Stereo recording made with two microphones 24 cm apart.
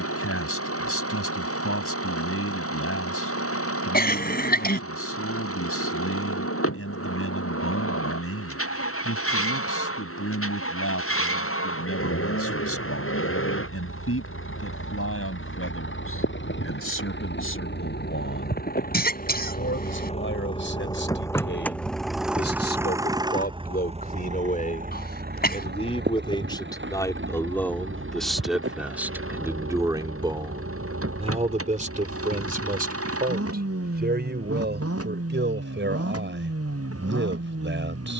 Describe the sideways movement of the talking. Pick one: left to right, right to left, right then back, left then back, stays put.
left to right.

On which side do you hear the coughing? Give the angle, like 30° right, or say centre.
40° left.